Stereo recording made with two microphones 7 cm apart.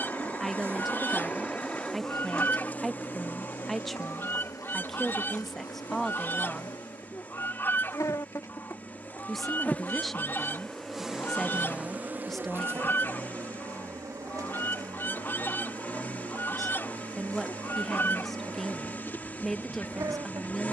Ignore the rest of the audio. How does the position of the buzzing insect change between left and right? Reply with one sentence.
In this clip you hear the buzzing insect move from right to left and back again.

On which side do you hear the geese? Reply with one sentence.
You can hear the geese on the left.